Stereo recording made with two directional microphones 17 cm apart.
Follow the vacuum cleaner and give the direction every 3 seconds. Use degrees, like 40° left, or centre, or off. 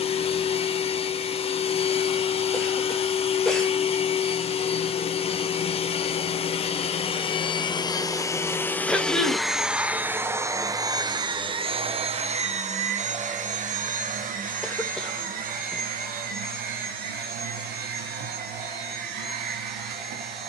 40° left, 40° left, 30° left, 20° right, 50° right, 60° right, 70° right.